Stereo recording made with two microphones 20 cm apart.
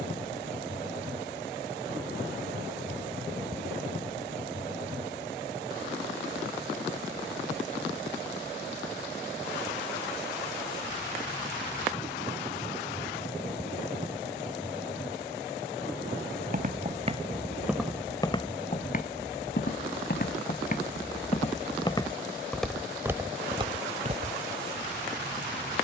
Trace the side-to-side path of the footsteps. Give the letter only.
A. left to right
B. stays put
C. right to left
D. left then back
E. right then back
D.